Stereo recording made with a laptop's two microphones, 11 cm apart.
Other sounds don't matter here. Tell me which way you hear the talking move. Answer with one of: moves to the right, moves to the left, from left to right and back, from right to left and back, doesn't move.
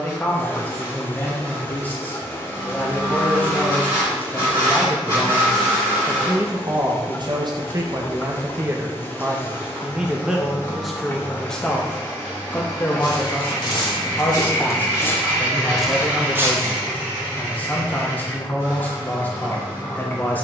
from left to right and back.